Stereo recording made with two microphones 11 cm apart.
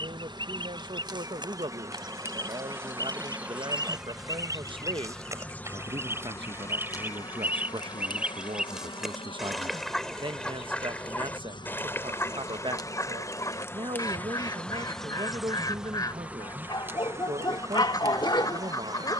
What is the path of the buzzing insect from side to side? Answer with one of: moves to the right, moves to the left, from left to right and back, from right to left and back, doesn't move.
from right to left and back.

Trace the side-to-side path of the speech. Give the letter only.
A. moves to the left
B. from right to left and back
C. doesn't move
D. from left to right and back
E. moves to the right
C.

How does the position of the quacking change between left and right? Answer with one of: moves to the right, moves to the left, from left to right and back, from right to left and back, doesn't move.
moves to the left.